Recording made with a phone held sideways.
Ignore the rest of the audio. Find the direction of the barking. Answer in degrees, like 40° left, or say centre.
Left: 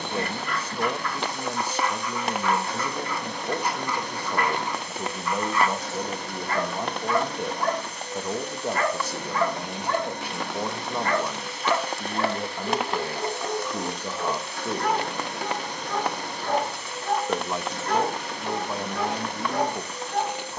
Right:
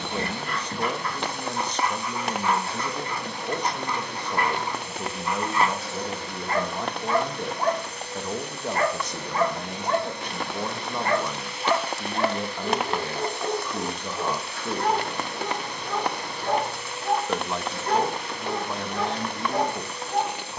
30° right.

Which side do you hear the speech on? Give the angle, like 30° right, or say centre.
10° left.